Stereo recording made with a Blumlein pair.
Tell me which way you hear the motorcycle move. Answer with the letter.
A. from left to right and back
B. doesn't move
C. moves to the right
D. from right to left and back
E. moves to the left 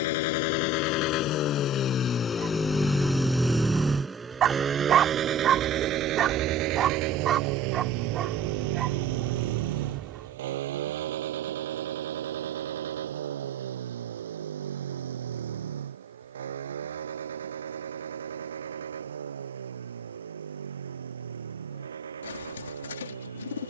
C.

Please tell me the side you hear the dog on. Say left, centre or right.
right.